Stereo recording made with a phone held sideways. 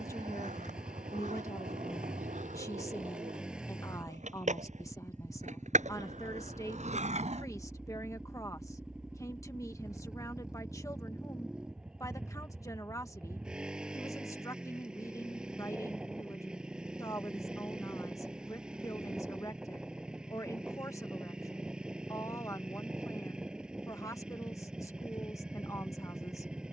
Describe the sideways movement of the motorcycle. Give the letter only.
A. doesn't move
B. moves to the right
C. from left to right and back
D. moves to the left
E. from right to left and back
A.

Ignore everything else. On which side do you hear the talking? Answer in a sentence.
You can hear the talking on the left.